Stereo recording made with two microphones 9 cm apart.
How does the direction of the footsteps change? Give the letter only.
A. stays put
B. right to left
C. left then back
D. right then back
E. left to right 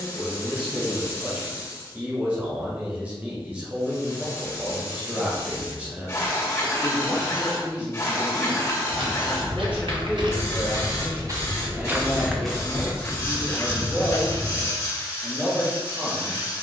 B.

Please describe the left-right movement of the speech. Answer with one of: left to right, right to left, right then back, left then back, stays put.
stays put.